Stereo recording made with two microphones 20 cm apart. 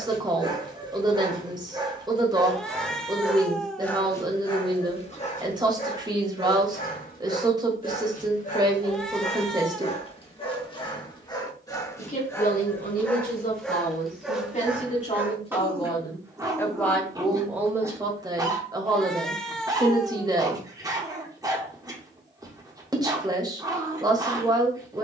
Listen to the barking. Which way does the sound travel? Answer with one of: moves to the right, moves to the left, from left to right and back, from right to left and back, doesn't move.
from right to left and back.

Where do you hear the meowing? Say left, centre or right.
centre.